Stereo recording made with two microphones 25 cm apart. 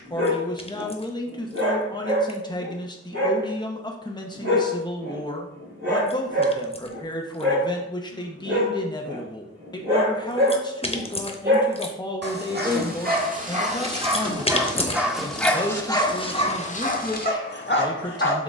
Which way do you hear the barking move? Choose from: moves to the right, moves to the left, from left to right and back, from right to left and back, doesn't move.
moves to the left.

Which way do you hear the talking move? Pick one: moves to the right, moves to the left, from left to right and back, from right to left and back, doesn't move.
doesn't move.